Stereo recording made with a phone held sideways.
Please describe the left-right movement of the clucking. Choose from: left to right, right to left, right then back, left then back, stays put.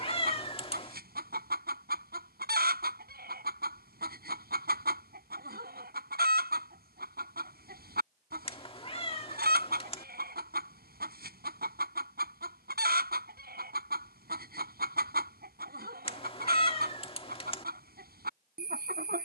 stays put.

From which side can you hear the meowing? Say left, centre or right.
left.